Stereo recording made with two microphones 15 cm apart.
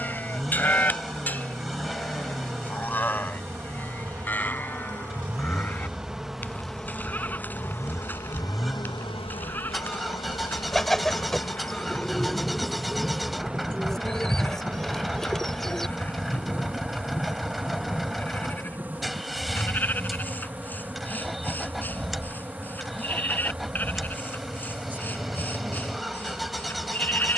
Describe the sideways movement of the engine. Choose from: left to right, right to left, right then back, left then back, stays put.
stays put.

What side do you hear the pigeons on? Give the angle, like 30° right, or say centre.
centre.